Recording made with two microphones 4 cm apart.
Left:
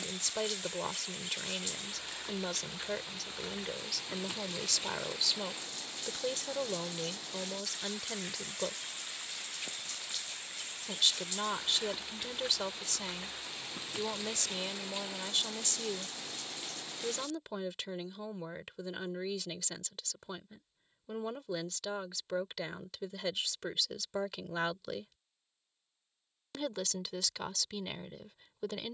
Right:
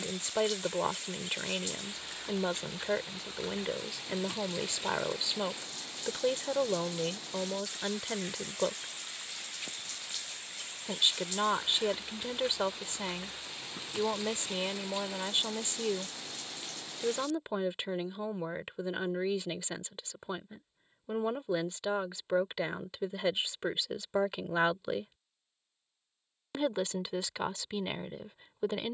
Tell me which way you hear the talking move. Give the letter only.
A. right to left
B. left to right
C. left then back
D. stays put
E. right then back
D.